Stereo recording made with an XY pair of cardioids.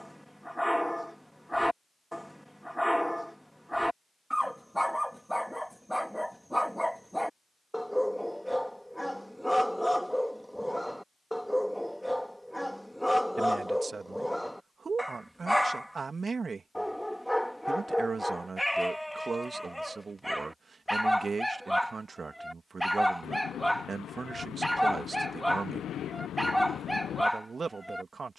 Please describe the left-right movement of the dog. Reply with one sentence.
You can hear the dog stay put.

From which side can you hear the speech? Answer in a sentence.
In this clip you hear the speech on the right.